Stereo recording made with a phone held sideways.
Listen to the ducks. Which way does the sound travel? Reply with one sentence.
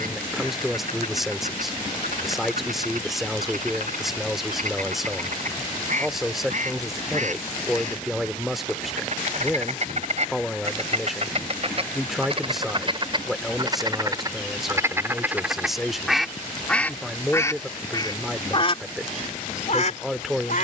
In this clip you hear the ducks move to the left.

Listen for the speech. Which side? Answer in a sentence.
You can hear the speech in the centre.